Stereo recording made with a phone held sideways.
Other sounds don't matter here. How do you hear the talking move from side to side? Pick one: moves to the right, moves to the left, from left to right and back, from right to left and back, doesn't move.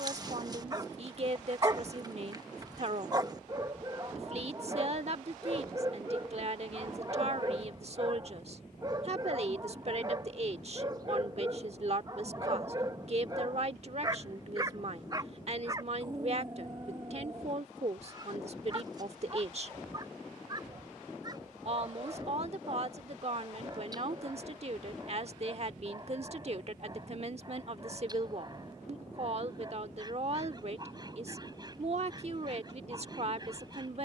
doesn't move.